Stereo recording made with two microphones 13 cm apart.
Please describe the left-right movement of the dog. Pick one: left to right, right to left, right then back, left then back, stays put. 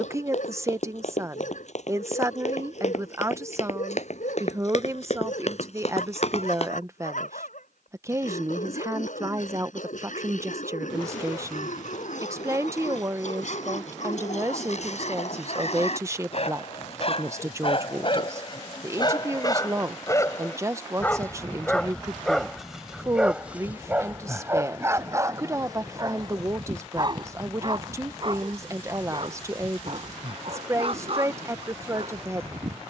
left to right.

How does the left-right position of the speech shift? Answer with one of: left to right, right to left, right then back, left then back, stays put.
stays put.